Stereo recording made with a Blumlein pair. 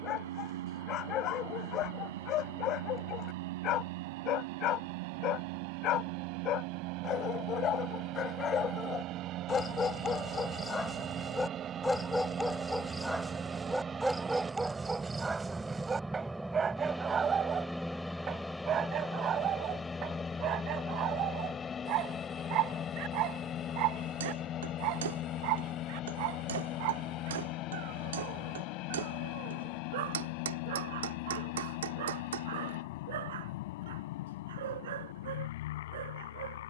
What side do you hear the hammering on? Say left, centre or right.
right.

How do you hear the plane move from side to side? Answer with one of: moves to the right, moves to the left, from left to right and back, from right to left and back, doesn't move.
moves to the left.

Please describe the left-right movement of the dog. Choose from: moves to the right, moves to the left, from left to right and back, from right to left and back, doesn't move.
moves to the right.